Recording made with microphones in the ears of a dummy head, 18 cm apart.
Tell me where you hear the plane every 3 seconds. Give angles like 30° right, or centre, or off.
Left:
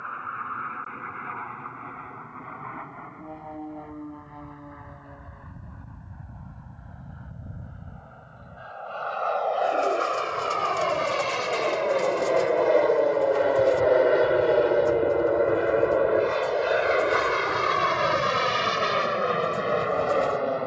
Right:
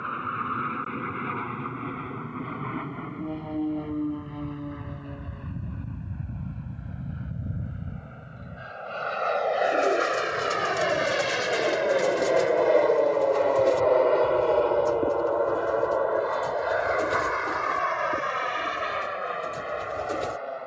50° right, 40° right, 30° right, 20° right, 10° left, 30° left, 50° left.